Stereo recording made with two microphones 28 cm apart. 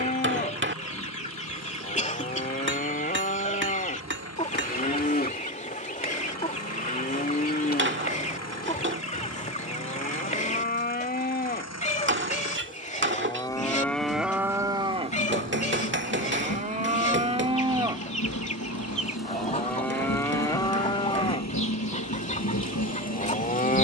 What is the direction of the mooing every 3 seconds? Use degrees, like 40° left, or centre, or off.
30° left, 30° left, 30° left, 30° left, 10° left, 20° right, 10° left, 30° left.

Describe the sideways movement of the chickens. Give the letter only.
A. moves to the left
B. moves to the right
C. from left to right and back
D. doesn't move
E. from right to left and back
D.